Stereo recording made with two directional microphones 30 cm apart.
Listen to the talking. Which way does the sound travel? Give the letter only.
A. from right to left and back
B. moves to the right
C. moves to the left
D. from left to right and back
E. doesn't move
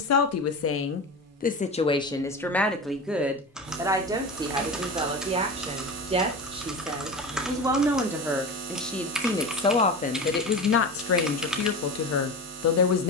D.